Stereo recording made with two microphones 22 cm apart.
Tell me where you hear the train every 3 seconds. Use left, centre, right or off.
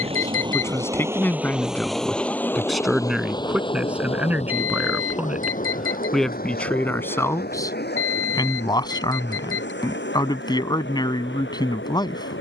centre, left, left, left.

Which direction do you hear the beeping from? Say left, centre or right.
left.